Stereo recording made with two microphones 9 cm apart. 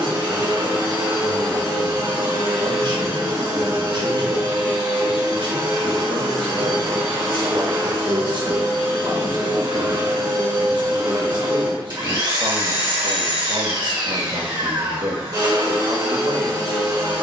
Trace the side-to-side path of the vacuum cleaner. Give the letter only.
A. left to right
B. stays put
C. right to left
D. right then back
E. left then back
B.